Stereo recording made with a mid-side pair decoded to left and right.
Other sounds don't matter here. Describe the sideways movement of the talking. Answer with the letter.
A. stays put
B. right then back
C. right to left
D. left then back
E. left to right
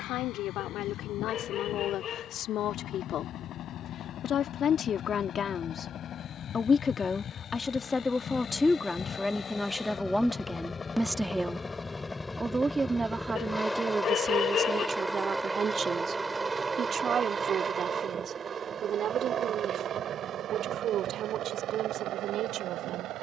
E.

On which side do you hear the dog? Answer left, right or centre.
left.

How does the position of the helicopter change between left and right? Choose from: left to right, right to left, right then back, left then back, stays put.
left to right.